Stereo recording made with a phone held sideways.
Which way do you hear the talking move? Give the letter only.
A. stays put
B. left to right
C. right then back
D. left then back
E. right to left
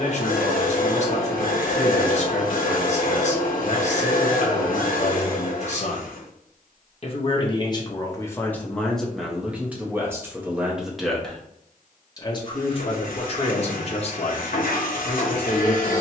C.